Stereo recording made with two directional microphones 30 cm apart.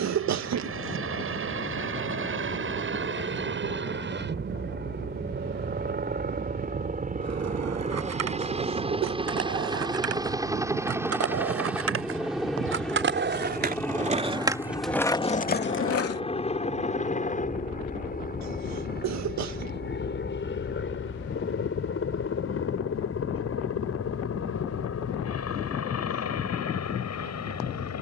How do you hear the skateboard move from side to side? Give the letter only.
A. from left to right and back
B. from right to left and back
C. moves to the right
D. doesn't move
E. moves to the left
E.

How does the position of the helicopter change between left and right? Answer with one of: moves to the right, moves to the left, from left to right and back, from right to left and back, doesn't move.
moves to the left.